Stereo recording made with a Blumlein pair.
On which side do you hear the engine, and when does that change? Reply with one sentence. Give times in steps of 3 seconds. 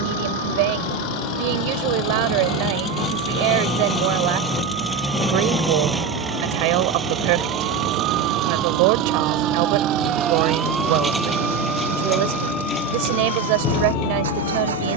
In this clip you hear the engine on the left from 0 s, in the centre from 3 s and on the right from 6 s.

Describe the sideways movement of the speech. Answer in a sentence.
You can hear the speech stay put.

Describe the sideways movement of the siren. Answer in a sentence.
You can hear the siren travel towards the left.